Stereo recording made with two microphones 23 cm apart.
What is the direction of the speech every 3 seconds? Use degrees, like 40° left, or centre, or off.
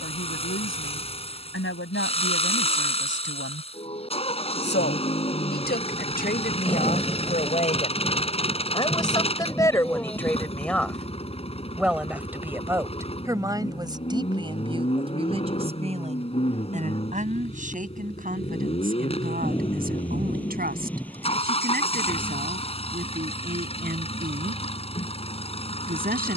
60° left, 50° left, 30° left, 10° left, 20° right, 30° right, 40° right, 40° right, 40° right.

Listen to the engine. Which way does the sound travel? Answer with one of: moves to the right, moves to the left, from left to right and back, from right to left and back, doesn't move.
doesn't move.